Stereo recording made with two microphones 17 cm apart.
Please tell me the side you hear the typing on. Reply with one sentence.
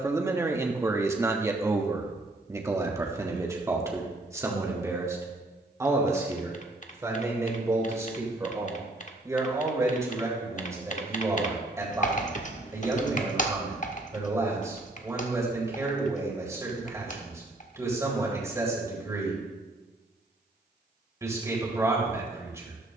You can hear the typing on the left.